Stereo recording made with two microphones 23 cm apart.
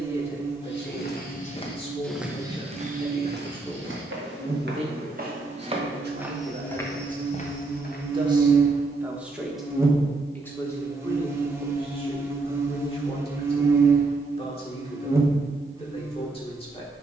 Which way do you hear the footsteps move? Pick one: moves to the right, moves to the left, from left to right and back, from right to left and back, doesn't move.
from left to right and back.